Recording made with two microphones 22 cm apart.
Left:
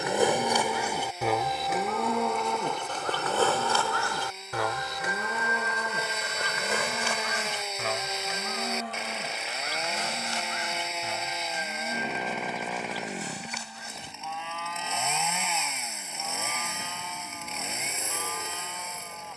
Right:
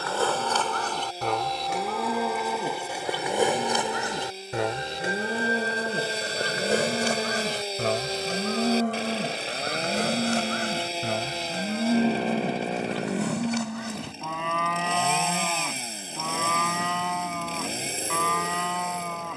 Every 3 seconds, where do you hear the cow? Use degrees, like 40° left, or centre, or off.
centre, 20° right, 40° right, 60° right, 60° right, 70° right, 70° right.